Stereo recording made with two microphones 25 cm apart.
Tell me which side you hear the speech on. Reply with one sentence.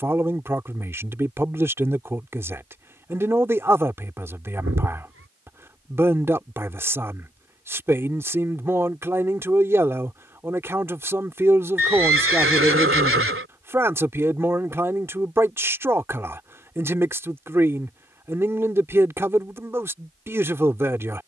In this clip you hear the speech in the centre.